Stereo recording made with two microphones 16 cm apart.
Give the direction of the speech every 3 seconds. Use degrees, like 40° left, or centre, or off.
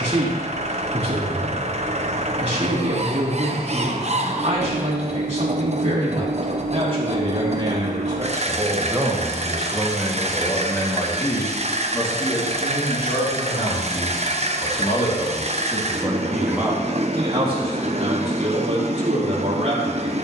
40° right, 40° right, 30° right, 10° left, 40° left, centre, 40° right.